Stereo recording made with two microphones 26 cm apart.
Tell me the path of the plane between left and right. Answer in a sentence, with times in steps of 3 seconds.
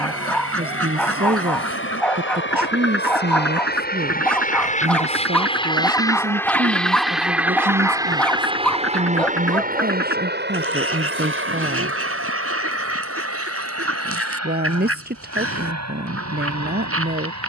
You can hear the plane on the left from 0 s, in the centre from 6 s and on the right from 9 s.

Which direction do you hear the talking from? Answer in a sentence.
In this clip you hear the talking on the right.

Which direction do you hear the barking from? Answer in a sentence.
You can hear the barking in the centre.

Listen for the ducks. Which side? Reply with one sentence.
You can hear the ducks on the right.